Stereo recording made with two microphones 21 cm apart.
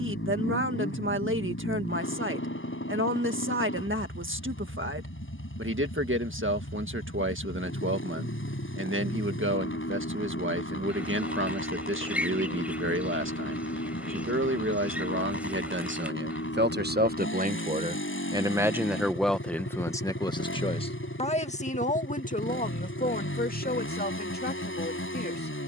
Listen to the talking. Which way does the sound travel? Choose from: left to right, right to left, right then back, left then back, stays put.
right to left.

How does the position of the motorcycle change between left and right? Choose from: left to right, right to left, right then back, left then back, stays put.
stays put.